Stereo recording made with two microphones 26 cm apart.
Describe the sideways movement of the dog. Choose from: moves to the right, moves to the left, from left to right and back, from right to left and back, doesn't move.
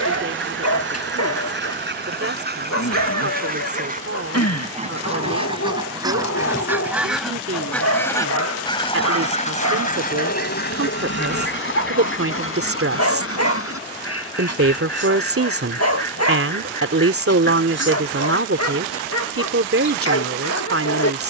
doesn't move.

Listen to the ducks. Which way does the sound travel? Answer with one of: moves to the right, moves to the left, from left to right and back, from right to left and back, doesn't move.
moves to the left.